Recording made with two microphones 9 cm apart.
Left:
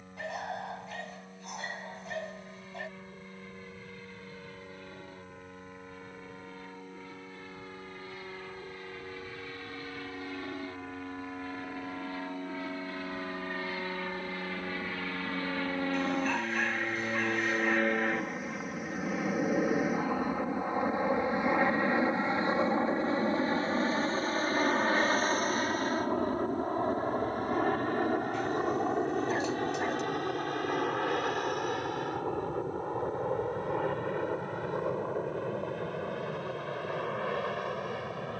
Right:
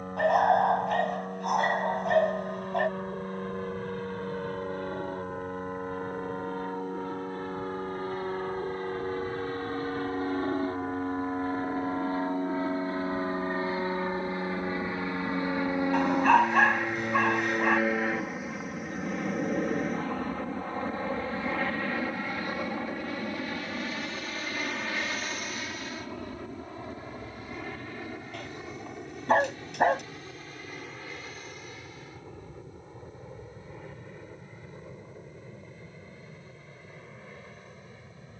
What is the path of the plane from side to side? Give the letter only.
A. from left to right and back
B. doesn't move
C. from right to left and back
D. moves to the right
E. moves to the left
E.